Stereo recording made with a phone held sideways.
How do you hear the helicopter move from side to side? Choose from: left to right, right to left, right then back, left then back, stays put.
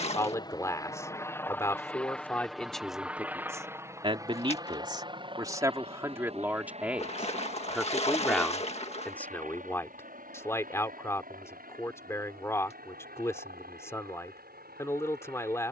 left to right.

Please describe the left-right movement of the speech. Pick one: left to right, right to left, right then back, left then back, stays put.
right then back.